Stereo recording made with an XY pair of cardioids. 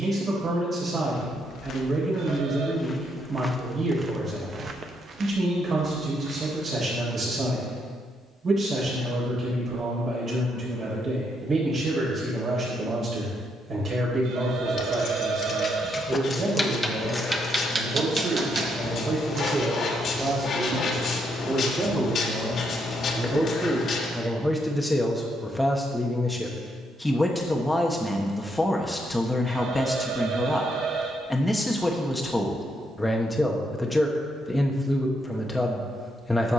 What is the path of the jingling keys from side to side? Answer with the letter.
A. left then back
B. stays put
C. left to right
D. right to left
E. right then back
C.